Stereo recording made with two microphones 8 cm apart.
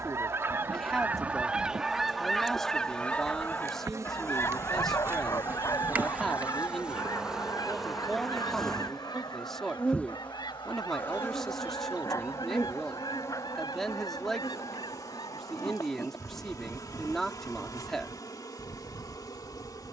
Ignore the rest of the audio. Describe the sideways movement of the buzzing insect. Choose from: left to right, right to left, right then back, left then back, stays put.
right to left.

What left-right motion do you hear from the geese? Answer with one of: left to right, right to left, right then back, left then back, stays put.
right to left.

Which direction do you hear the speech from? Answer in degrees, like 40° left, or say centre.
centre.